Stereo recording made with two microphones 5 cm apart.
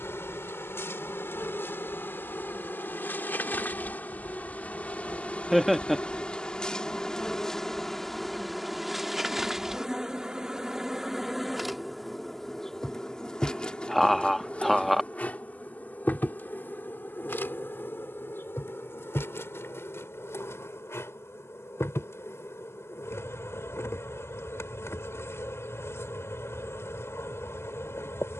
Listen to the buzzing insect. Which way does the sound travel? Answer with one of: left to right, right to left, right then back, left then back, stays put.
right then back.